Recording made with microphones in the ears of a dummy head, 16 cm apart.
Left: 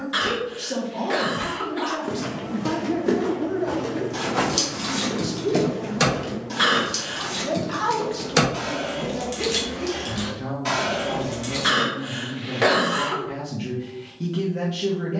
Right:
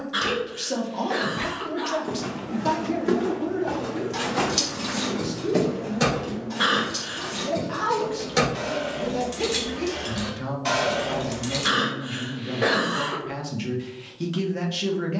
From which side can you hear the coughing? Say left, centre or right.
left.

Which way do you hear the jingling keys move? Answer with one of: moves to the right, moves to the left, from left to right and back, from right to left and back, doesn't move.
from right to left and back.